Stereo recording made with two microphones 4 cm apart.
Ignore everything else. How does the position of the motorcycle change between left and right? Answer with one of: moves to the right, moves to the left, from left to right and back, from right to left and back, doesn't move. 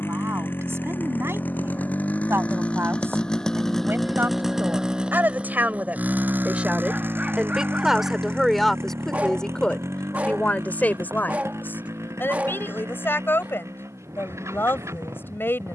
moves to the right.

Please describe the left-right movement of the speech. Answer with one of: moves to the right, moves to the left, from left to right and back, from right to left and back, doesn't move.
moves to the left.